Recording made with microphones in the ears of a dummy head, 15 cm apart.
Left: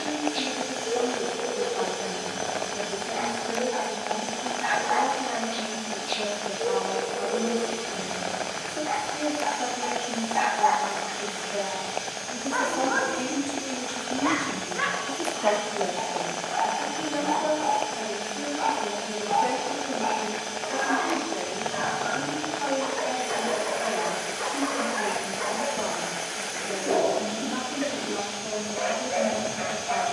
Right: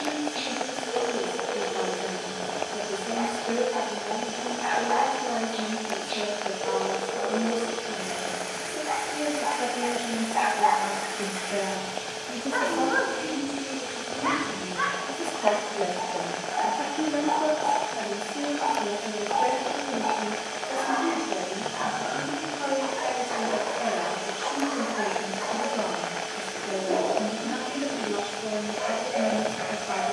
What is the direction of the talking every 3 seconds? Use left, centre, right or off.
right, right, right, right, left, right, right, right, right, right.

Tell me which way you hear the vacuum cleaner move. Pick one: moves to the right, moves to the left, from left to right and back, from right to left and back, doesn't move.
doesn't move.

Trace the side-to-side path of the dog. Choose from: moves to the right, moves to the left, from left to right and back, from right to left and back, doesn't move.
from left to right and back.